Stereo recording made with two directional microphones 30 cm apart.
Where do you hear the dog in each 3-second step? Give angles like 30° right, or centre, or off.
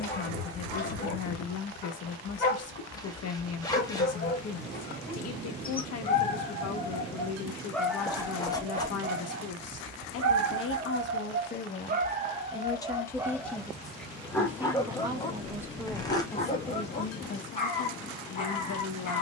30° left, 30° left, 10° left, 50° right, 10° right, 20° left, 30° left.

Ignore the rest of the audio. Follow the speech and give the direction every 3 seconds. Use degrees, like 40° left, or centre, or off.
60° left, 60° left, 60° left, 40° left, 10° left, 10° left, 50° left.